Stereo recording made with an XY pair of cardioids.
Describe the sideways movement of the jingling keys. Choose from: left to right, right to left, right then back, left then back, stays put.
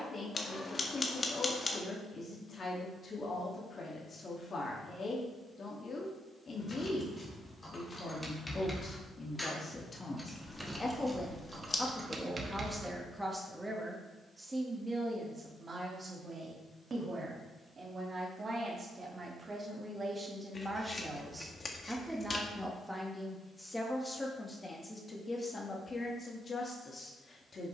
left to right.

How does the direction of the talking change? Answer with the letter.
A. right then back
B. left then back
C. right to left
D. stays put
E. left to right
A.